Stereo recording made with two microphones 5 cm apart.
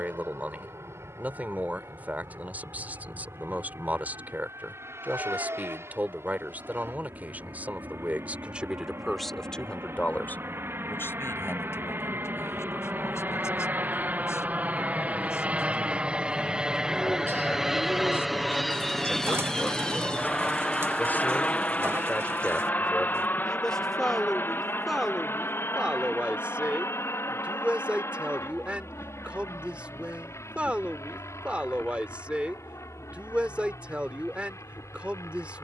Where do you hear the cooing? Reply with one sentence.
In this clip you hear the cooing on the right.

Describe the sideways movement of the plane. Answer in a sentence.
In this clip you hear the plane move to the left.